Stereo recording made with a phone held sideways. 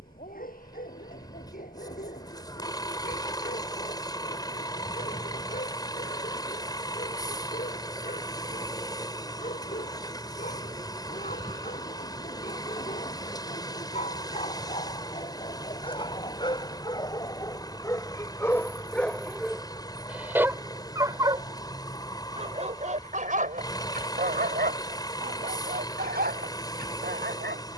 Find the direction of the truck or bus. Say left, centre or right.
left.